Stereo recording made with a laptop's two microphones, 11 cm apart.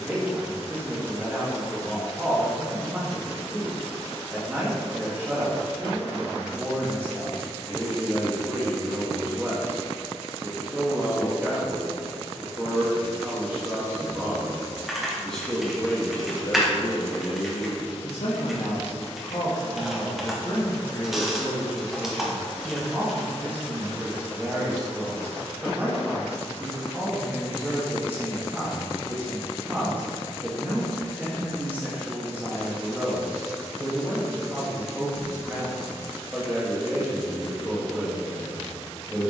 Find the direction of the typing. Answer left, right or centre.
centre.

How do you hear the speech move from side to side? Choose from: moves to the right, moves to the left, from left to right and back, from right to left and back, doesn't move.
from right to left and back.